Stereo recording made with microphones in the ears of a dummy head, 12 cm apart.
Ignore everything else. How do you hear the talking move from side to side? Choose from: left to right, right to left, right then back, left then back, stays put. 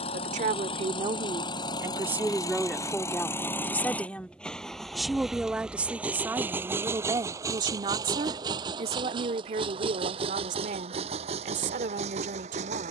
left then back.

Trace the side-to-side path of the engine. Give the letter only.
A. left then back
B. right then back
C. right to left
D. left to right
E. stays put
D.